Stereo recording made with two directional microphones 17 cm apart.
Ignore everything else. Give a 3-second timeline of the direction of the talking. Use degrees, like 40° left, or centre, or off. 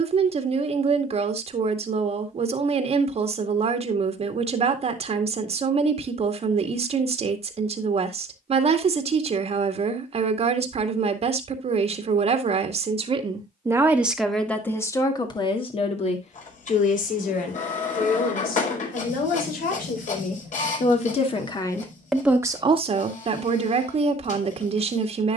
40° right, 40° right, 40° right, 40° right, 20° right, 40° left, 50° left, 10° right, 30° right.